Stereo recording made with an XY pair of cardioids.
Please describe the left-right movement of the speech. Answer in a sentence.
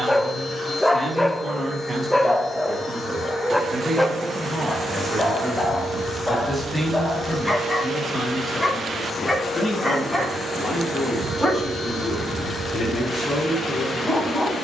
You can hear the speech go from the right side to the left.